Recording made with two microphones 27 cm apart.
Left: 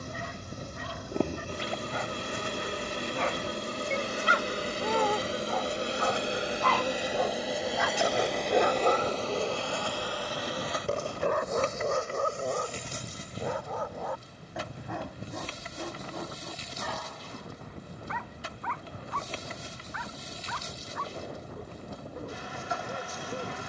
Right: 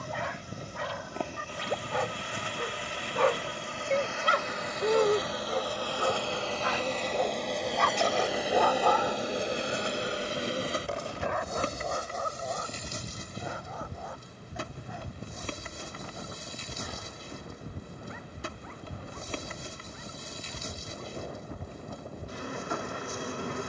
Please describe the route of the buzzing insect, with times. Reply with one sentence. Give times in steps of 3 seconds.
You can hear the buzzing insect on the left from 0 s, in the centre from 6 s and on the right from 9 s.